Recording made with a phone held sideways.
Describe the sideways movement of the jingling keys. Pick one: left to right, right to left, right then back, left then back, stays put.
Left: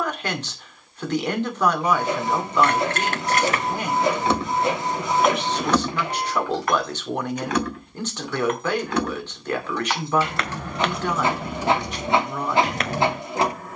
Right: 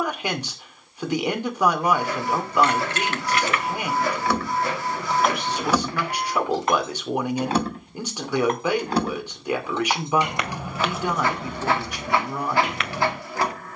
right then back.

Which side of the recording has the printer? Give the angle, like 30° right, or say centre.
20° left.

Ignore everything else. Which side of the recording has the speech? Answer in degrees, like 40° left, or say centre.
10° right.